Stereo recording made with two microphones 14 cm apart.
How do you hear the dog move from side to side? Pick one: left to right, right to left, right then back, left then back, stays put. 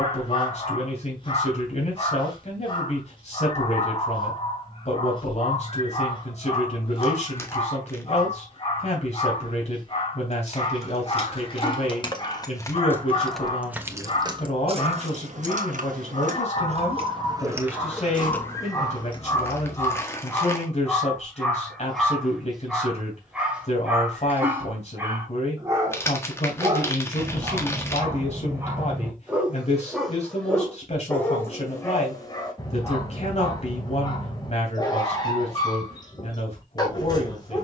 right then back.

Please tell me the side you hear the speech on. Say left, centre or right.
left.